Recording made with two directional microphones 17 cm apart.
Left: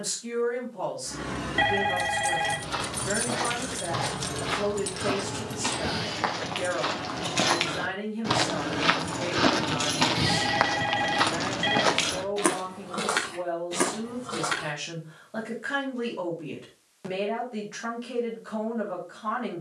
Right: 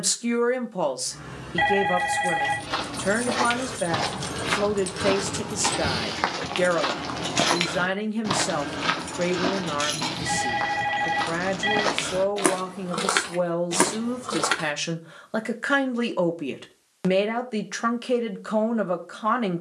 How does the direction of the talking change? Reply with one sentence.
In this clip you hear the talking stay in one place.